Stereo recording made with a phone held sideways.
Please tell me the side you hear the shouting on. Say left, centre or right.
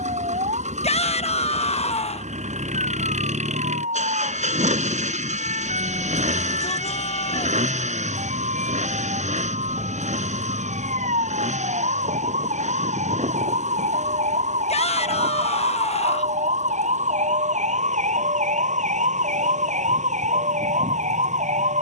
left.